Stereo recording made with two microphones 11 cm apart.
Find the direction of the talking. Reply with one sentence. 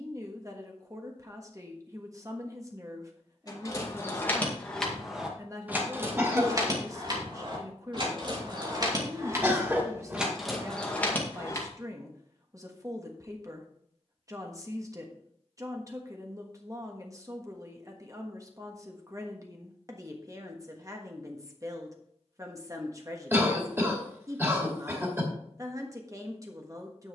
In this clip you hear the talking on the right.